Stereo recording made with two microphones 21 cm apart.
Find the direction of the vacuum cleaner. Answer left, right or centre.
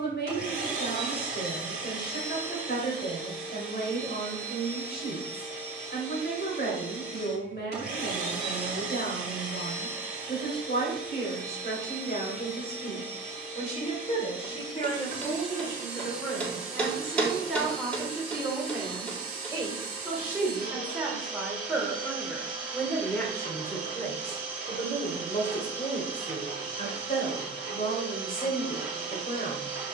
left.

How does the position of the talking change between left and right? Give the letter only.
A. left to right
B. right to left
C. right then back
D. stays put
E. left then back
C.